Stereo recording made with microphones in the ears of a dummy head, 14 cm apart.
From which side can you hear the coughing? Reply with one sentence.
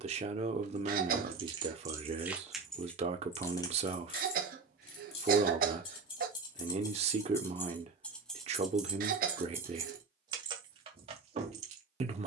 You can hear the coughing on the right.